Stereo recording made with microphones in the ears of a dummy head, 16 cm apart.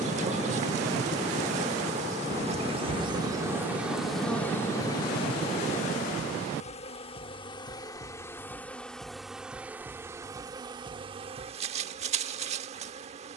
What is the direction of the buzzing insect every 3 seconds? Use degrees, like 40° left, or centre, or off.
40° right, centre, 20° left, 20° right, 40° right.